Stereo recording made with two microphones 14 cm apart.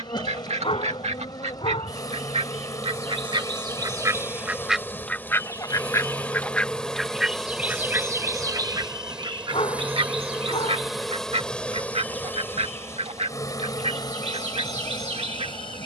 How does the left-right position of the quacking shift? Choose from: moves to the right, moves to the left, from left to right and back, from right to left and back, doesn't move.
from right to left and back.